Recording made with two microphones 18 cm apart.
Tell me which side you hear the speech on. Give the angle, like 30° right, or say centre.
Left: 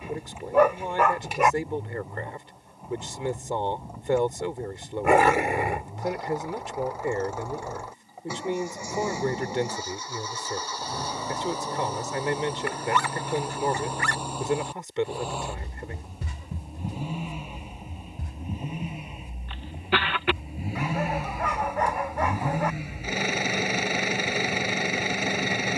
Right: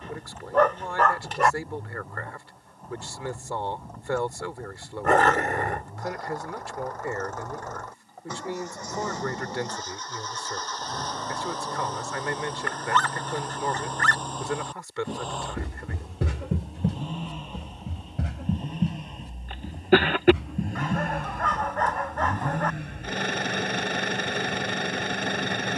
20° left.